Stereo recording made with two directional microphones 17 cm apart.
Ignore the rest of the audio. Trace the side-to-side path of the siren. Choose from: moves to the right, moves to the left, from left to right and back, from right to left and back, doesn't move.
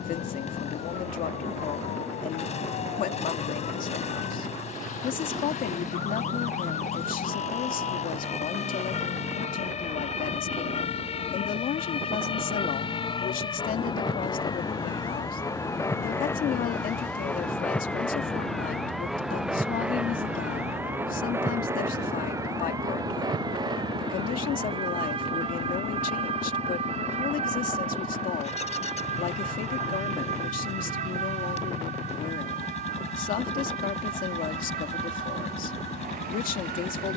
moves to the right.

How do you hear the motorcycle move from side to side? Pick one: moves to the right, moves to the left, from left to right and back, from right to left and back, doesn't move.
doesn't move.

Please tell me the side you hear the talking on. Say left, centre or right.
left.